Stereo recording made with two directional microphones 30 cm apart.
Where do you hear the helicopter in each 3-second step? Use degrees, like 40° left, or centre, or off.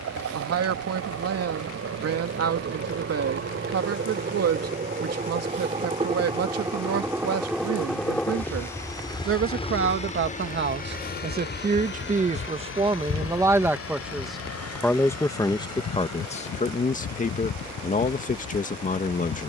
50° right, 30° right, centre, 20° left, 40° left, 50° left, 60° left.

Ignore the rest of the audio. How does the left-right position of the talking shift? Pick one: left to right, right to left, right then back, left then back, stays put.
right to left.